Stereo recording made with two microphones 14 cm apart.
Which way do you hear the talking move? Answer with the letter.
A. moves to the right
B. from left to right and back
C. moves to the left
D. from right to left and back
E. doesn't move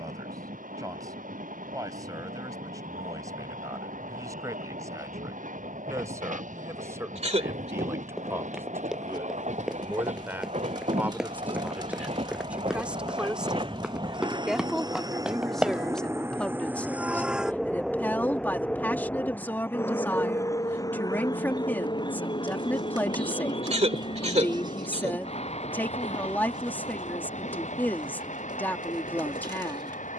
C.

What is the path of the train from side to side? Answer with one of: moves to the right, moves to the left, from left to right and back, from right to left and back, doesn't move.
moves to the left.